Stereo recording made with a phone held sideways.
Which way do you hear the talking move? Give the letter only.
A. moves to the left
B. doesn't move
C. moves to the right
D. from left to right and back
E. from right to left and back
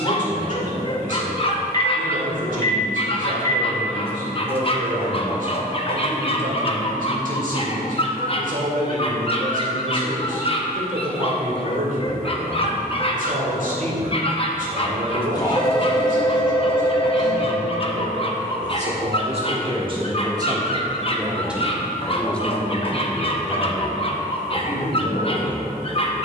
A.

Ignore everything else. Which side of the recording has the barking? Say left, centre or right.
left.